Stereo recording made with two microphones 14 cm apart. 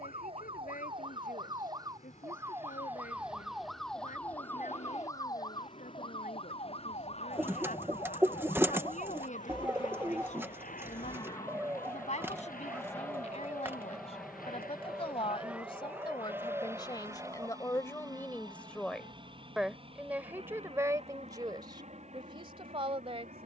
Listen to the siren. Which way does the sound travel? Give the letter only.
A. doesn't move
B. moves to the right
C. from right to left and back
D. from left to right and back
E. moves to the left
E.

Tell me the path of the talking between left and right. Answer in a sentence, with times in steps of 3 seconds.
In this clip you hear the talking on the left from 0 s, in the centre from 18 s and on the right from 21 s.